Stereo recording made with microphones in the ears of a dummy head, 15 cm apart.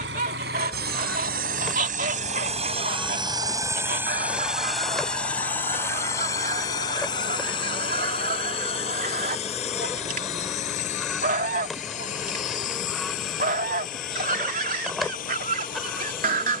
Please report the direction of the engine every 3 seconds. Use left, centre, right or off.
right, centre, left, left, left, left.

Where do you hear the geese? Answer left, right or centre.
right.